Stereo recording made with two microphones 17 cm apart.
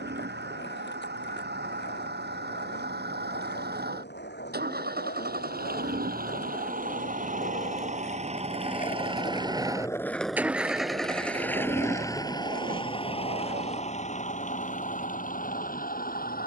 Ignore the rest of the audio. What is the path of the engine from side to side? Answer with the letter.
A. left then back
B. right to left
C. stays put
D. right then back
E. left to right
B.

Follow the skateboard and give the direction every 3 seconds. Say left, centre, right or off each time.
left, left, left, centre, right, off.